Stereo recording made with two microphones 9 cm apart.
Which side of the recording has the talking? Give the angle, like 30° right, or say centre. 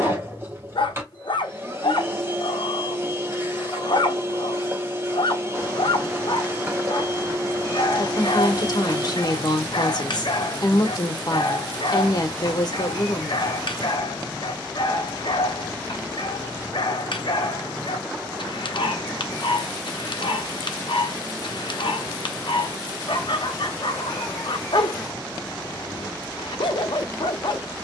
50° left.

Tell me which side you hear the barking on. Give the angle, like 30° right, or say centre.
70° left.